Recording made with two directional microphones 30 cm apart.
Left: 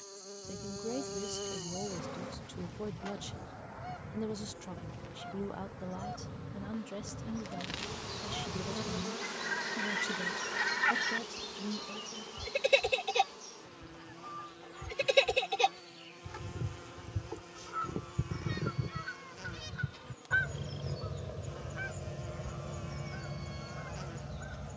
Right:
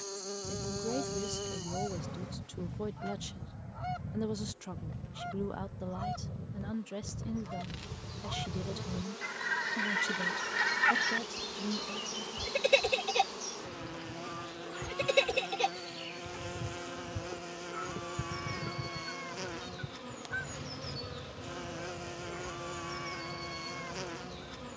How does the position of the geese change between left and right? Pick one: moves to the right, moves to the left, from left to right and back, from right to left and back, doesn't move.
moves to the left.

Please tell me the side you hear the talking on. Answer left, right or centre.
centre.